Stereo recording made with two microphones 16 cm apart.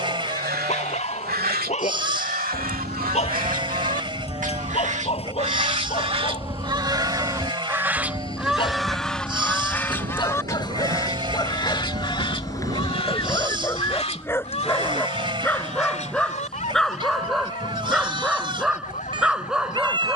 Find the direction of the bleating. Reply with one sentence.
In this clip you hear the bleating on the right.